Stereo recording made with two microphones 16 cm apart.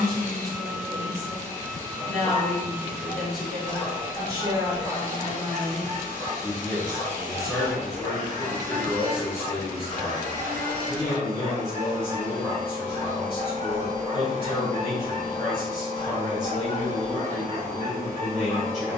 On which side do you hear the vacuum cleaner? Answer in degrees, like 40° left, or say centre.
50° right.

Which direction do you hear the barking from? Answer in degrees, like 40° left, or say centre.
30° left.